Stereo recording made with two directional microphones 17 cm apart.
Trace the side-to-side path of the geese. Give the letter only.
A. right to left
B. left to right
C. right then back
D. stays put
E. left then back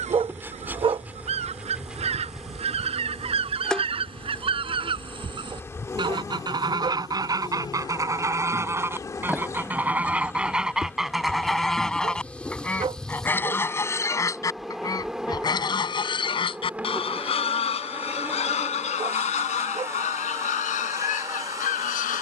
A.